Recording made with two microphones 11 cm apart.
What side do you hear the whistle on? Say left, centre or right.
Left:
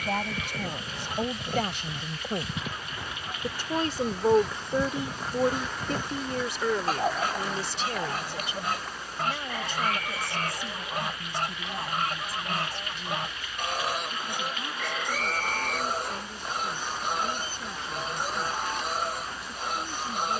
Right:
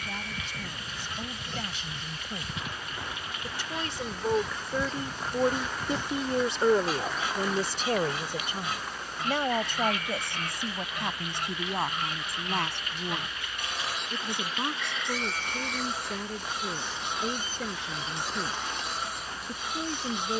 left.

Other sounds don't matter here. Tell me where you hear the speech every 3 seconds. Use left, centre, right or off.
left, left, right, right, right, right, right.